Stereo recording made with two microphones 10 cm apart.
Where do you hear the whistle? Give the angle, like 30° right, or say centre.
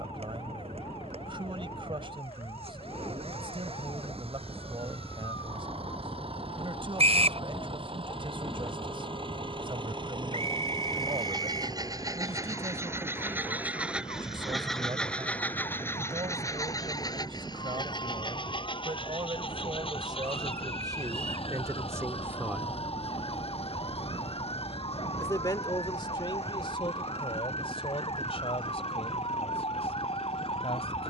80° right.